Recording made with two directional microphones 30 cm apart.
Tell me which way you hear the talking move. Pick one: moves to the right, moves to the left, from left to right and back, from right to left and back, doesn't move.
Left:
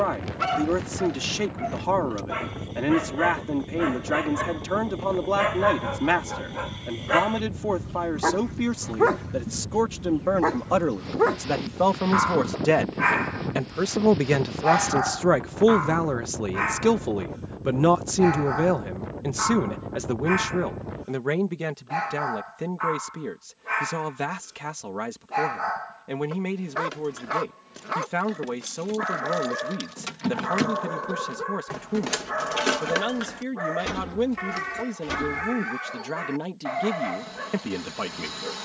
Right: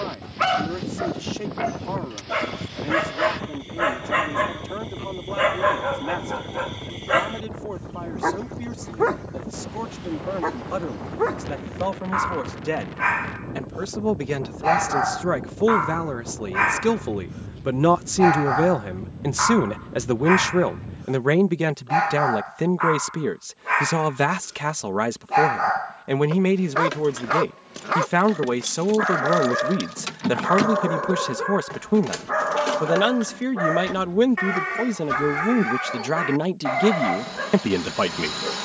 moves to the right.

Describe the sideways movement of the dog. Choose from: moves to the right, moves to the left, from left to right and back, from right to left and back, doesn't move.
from right to left and back.